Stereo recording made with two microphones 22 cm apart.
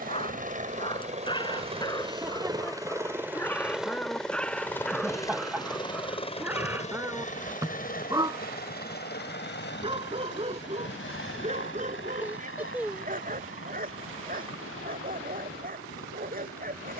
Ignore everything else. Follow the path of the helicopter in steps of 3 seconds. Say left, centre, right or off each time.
right, centre, left, left, left, left.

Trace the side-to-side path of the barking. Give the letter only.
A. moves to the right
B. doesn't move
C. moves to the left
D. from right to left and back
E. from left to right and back
A.